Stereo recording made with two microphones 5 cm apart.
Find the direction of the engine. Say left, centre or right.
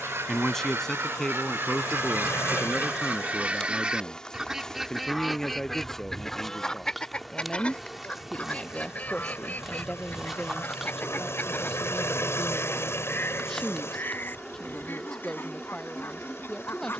left.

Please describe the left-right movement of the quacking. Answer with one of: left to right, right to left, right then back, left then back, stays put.
right to left.